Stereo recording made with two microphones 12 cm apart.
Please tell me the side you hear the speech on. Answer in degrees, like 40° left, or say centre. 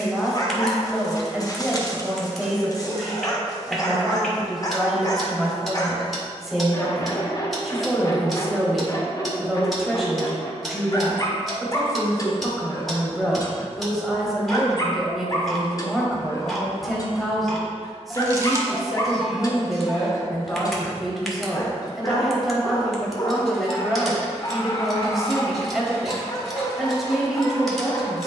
centre.